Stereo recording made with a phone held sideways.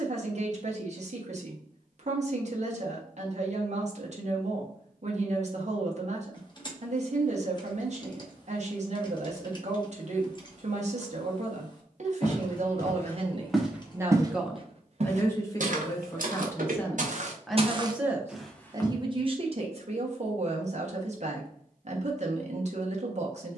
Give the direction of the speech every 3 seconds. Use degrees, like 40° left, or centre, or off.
50° right, 50° right, 50° right, 50° right, 40° right, 10° left, 40° right, 50° right.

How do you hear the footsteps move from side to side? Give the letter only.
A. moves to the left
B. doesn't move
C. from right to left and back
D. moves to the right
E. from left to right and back
E.